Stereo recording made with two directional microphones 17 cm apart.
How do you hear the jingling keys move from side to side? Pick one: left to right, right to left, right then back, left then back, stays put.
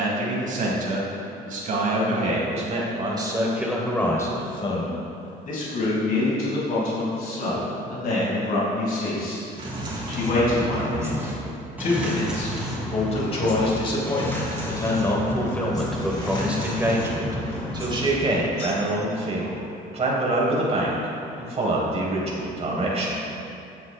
right to left.